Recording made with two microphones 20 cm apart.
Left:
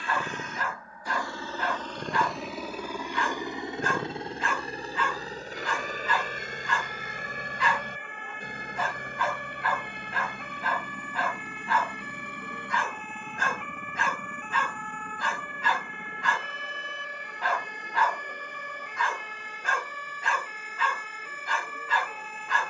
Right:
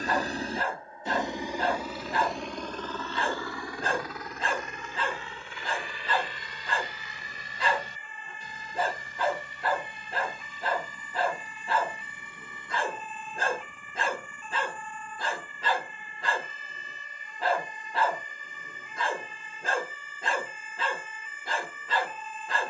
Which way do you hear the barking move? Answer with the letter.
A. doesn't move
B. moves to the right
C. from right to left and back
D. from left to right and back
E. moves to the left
A.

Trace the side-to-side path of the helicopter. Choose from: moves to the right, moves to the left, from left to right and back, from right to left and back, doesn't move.
moves to the left.